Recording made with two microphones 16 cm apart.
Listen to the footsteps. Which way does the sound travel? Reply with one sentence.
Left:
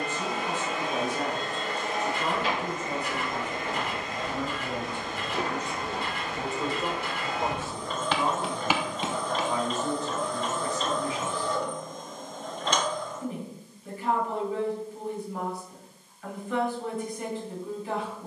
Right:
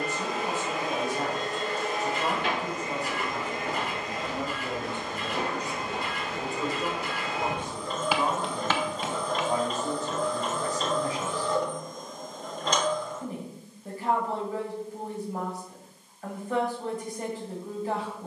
You can hear the footsteps move to the left.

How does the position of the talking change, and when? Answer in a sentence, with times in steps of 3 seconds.
You can hear the talking on the right from 0 s, in the centre from 6 s and on the right from 9 s.